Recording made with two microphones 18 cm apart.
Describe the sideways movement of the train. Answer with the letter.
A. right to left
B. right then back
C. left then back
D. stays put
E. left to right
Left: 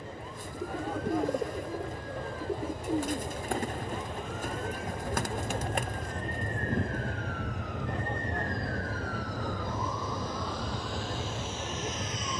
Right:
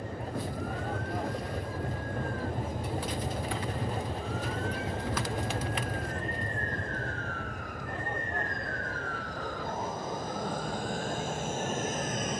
A.